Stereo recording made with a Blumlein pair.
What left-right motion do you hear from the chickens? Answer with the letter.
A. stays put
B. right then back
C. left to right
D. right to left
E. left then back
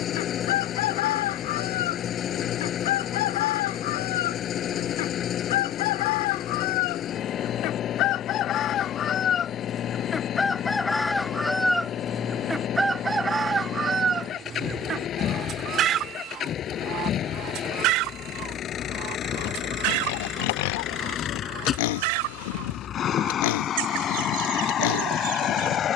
C.